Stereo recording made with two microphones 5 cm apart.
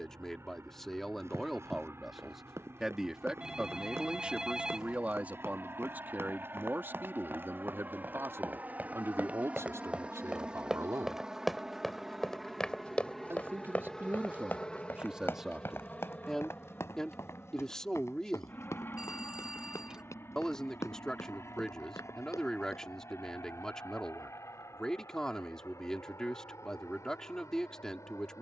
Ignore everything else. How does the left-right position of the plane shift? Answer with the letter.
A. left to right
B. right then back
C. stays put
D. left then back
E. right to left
E.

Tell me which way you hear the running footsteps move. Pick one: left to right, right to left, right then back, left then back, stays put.
right to left.